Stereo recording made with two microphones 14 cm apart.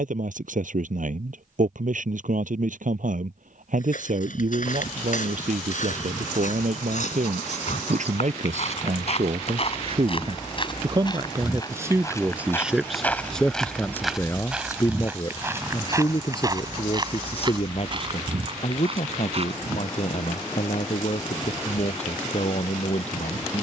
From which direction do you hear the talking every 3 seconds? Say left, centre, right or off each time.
right, right, right, right, centre, left, left, left.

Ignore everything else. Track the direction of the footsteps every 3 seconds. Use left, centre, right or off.
off, left, left, left, centre, right, right, off.